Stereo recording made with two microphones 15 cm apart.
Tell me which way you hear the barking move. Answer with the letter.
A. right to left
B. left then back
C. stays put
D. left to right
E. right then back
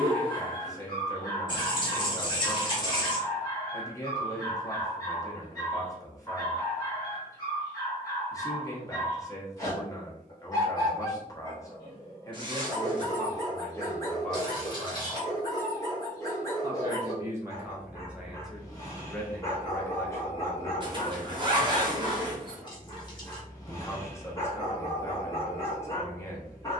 C.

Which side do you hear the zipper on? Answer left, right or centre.
right.